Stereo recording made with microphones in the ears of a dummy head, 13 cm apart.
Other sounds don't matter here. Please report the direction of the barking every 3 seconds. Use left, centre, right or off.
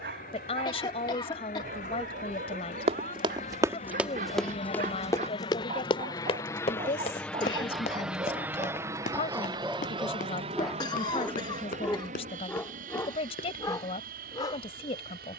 right, right, right, centre, left.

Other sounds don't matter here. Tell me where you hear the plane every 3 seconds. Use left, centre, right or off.
left, left, centre, right, right.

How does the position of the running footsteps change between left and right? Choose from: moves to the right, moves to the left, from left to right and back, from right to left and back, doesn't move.
moves to the left.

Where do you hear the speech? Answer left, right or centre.
left.